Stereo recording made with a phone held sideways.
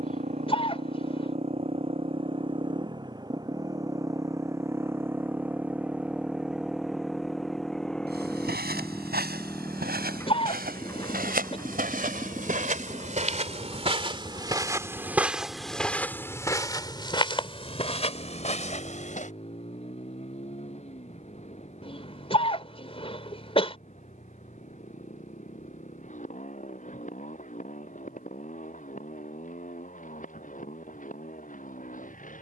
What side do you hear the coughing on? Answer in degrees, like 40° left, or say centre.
30° left.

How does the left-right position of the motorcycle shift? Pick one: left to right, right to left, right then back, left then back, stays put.
right to left.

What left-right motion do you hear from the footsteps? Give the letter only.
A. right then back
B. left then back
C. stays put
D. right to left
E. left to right
D.